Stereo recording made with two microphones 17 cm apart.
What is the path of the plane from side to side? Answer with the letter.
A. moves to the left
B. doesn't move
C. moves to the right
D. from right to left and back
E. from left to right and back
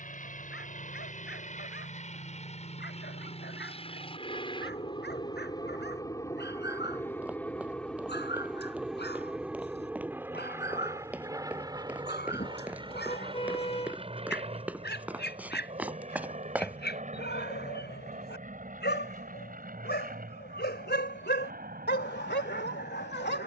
C.